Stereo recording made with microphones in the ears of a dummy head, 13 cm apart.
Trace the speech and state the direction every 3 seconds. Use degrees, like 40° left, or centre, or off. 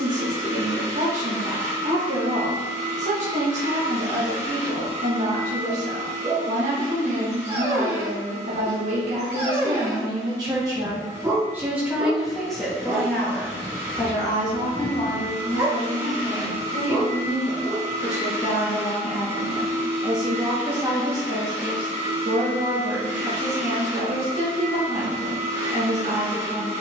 50° right, 50° right, 50° right, 30° right, 10° left, 30° left, centre, 40° right, 40° right.